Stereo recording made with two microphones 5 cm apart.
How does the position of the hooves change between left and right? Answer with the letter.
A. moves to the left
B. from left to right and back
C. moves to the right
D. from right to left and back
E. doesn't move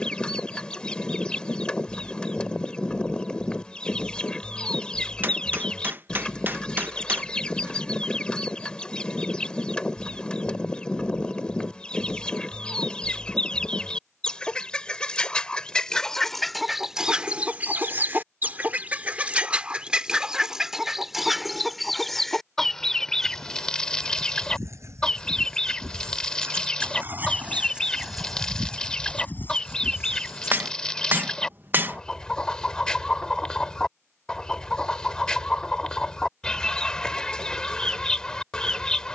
A.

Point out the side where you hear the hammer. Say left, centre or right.
right.